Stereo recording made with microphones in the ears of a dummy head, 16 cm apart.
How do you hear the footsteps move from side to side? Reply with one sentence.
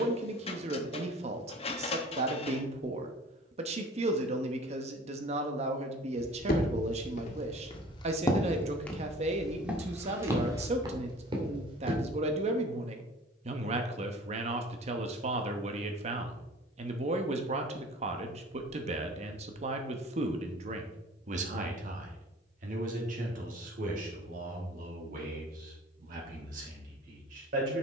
You can hear the footsteps travel towards the right.